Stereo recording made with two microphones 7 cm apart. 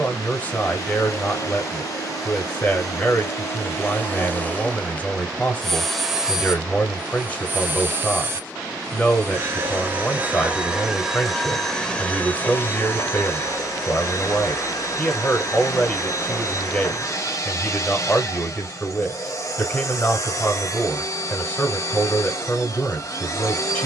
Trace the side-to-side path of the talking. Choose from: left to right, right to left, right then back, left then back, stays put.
stays put.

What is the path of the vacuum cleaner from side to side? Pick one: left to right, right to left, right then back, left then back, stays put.
right then back.